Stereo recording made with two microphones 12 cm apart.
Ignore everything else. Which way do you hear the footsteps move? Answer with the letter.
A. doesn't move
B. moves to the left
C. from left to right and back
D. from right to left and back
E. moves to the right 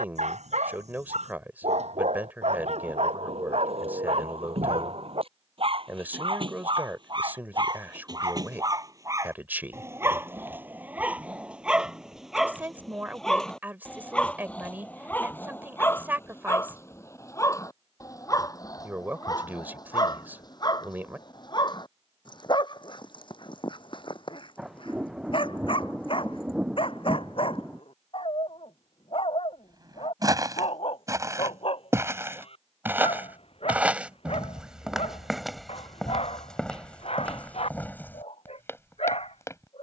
B.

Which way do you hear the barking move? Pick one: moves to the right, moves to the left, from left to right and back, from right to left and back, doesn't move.
moves to the left.